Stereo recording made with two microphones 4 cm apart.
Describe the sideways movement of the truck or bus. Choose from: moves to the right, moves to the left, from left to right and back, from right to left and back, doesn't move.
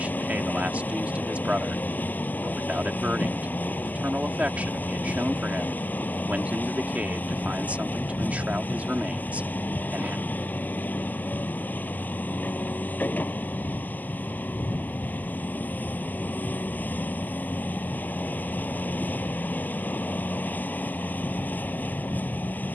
doesn't move.